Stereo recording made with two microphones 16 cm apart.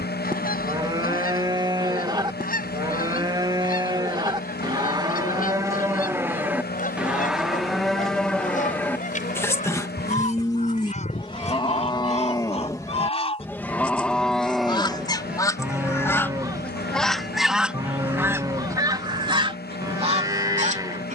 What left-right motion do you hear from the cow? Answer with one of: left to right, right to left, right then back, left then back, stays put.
left then back.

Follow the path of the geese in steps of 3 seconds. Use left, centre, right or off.
left, left, left, left, left, centre, right.